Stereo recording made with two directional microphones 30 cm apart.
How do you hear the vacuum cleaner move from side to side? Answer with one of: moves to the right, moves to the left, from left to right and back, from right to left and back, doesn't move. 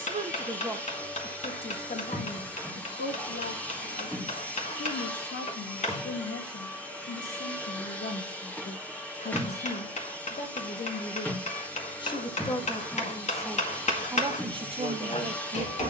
doesn't move.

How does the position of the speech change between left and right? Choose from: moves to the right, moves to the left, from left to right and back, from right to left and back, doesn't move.
from right to left and back.